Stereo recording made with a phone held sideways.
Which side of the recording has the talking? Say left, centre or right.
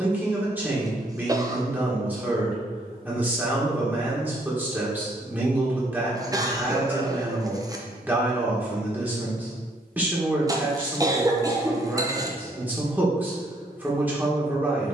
centre.